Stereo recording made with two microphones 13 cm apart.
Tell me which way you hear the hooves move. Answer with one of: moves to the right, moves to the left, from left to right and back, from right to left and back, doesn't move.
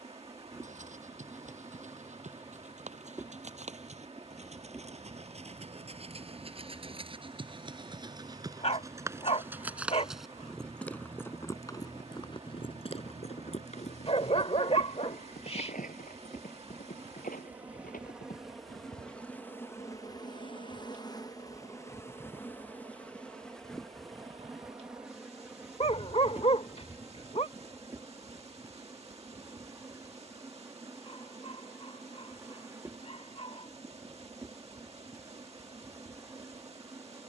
moves to the left.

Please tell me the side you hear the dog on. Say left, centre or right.
left.